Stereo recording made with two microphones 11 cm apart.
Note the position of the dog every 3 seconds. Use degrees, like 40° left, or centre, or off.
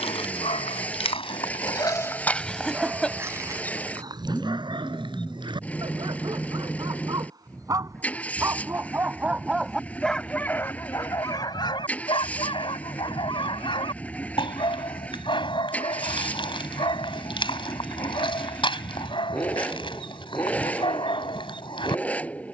40° left, 40° right, 30° right, 20° left, 50° left, 50° left, 50° left, 50° left.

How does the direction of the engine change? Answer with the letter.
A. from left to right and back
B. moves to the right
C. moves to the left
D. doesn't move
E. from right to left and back
D.